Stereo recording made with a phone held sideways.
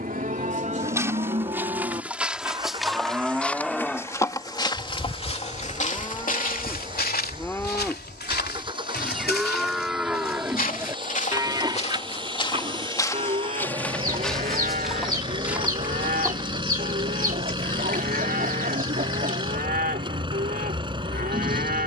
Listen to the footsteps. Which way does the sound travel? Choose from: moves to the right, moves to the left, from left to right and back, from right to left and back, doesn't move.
from right to left and back.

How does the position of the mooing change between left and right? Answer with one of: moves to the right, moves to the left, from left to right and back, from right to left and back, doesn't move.
from right to left and back.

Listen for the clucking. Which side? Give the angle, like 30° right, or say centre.
60° right.